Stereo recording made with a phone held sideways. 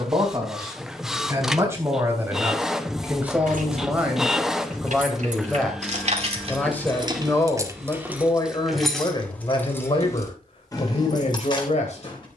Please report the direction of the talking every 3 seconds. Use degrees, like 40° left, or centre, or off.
20° right, centre, 20° left, 40° left.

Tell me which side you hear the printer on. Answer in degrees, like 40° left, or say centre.
centre.